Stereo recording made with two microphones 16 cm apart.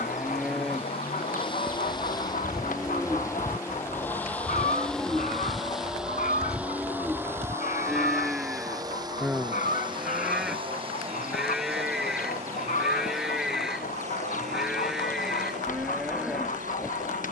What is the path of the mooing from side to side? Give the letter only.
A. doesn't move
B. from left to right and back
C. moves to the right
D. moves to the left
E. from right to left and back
A.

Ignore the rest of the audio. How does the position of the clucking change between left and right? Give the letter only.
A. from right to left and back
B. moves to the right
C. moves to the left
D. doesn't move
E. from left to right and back
D.